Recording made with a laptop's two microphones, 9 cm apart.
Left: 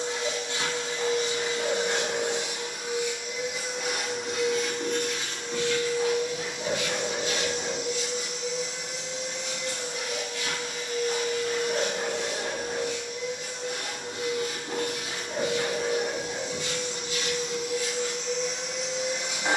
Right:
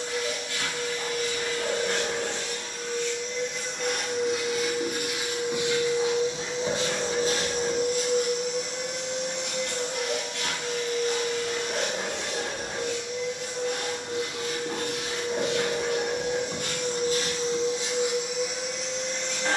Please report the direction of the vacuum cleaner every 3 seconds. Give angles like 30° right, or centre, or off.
20° left, centre, 40° right, 70° right, 80° right, 50° right, centre.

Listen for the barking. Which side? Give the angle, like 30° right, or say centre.
30° right.